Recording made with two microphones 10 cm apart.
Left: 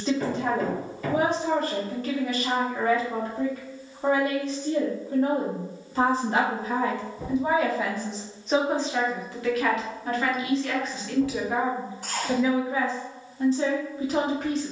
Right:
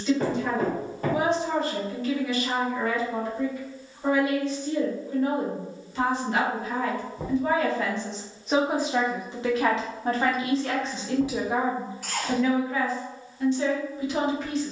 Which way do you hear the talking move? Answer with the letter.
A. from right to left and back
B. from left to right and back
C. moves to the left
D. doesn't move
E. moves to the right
B.